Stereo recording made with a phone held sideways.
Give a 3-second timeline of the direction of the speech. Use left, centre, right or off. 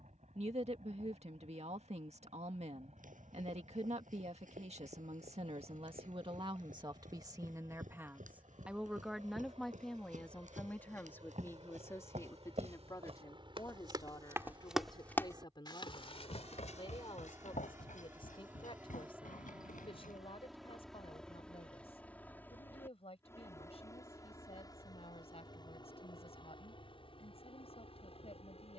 right, right, right, centre, left, left, left, left, left, left.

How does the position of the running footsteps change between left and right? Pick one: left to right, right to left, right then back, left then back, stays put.
right to left.